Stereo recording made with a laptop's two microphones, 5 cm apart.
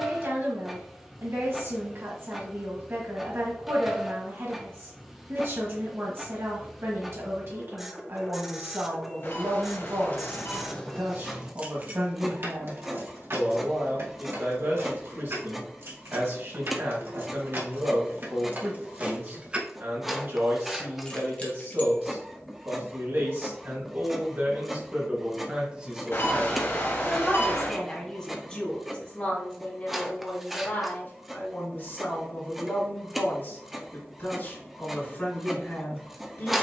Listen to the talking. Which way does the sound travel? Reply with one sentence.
You can hear the talking move to the left.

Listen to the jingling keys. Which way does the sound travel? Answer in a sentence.
In this clip you hear the jingling keys go right and come back.